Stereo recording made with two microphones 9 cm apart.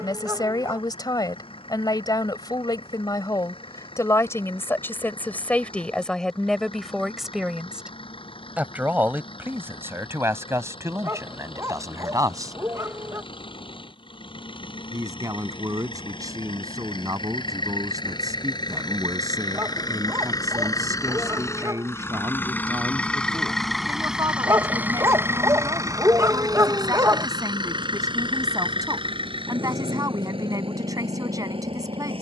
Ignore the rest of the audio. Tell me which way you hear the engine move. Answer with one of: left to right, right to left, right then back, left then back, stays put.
left to right.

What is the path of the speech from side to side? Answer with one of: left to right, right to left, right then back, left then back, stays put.
left to right.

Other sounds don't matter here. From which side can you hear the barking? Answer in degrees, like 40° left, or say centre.
40° right.